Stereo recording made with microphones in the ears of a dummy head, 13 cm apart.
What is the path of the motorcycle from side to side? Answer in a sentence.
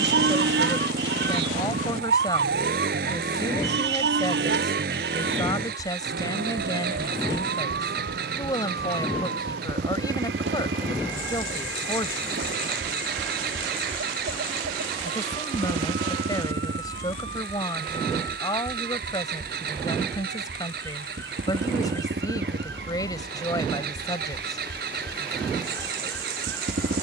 You can hear the motorcycle stay put.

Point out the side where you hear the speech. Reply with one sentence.
In this clip you hear the speech on the left.